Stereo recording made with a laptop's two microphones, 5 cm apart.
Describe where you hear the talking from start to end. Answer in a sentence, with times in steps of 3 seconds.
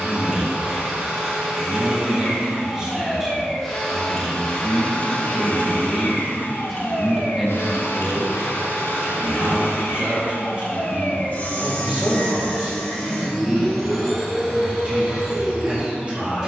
You can hear the talking on the right from 0 s, in the centre from 3 s and on the right from 9 s.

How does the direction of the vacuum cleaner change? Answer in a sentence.
You can hear the vacuum cleaner go left and come back.